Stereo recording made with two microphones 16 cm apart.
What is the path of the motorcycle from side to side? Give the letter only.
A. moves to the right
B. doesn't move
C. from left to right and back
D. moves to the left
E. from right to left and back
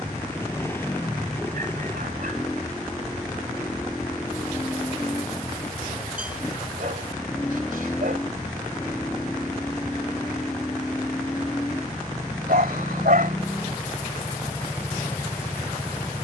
B.